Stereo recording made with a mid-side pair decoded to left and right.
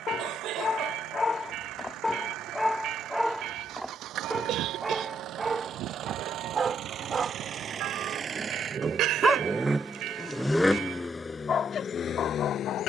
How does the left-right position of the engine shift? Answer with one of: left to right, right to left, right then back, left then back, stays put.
right to left.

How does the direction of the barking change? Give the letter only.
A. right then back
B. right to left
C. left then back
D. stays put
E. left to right
A.